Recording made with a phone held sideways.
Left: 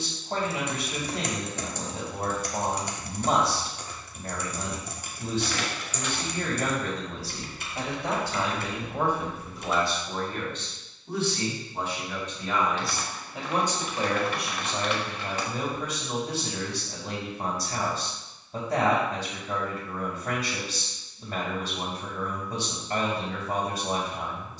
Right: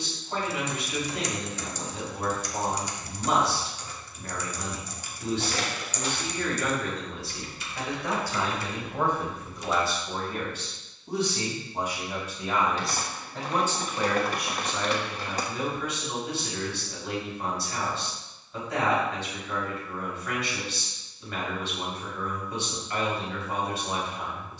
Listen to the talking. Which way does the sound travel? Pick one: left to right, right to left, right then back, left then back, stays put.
right then back.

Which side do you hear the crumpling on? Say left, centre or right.
right.